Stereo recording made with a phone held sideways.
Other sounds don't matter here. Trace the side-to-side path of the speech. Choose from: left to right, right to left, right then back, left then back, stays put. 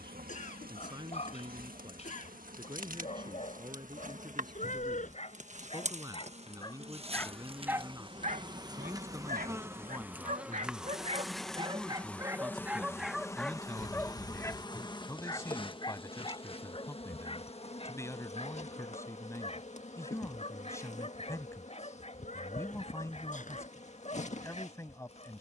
right to left.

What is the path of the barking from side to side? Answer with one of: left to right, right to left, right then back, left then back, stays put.
right then back.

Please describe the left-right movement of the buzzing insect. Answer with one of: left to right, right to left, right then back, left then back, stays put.
right to left.